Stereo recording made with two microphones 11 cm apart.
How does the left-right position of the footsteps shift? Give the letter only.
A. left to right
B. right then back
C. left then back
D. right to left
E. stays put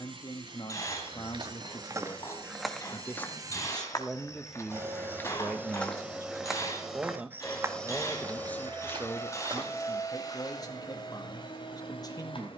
C.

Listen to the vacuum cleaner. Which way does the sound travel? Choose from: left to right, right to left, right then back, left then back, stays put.
right to left.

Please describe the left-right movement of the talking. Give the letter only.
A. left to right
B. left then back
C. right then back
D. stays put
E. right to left
C.